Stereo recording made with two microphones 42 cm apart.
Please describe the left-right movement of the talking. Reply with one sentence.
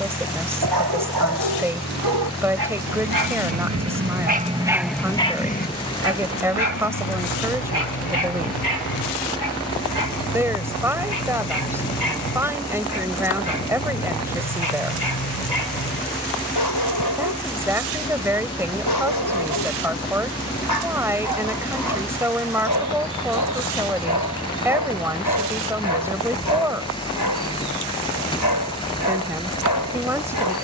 In this clip you hear the talking stay put.